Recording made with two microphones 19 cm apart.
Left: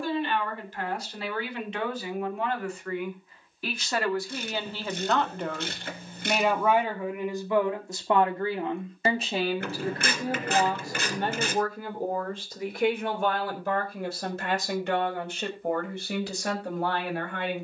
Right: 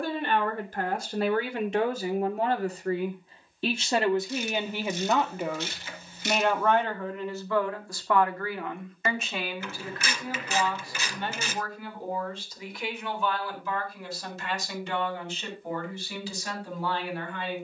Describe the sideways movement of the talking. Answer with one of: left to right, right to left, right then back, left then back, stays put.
right to left.